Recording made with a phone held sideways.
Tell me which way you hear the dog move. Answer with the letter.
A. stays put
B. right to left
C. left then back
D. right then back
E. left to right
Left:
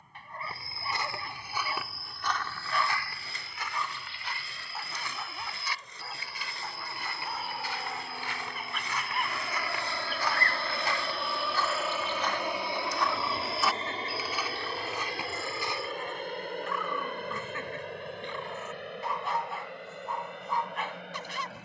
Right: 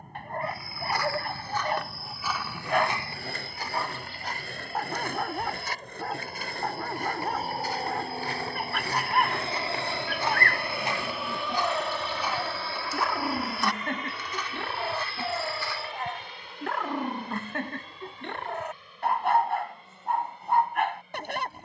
A.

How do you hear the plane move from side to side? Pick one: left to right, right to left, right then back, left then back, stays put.
right to left.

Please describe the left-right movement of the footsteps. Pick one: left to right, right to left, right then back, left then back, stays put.
right then back.